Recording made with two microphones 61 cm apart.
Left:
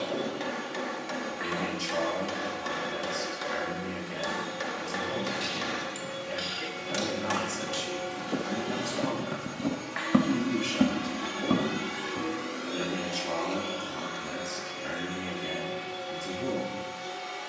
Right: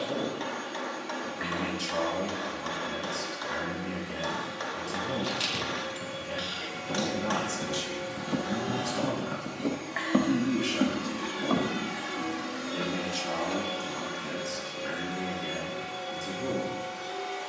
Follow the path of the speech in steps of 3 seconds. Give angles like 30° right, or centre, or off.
60° right, 60° right, 50° right, 20° right, centre, 10° left.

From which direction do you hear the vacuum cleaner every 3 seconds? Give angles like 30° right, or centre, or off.
70° left, 70° left, 60° left, 30° left, 40° right, 70° right.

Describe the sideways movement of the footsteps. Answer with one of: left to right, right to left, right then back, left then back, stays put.
right to left.